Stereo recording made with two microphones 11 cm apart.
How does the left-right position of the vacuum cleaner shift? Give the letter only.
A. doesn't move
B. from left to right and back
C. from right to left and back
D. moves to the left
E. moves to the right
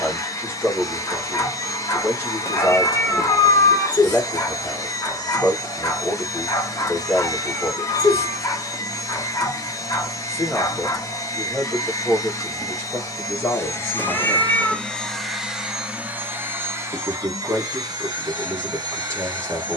E.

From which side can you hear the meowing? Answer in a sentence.
You can hear the meowing on the left.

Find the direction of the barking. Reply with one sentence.
In this clip you hear the barking on the left.